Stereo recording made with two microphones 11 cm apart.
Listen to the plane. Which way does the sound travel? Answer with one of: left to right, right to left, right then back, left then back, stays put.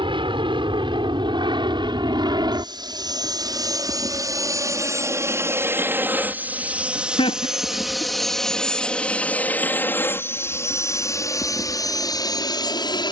right to left.